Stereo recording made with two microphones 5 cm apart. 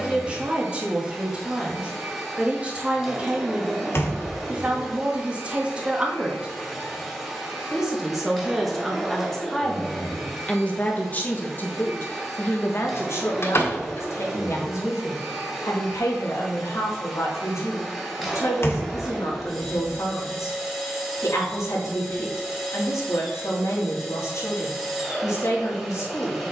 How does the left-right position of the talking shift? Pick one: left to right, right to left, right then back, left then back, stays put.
right to left.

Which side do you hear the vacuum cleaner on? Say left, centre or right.
centre.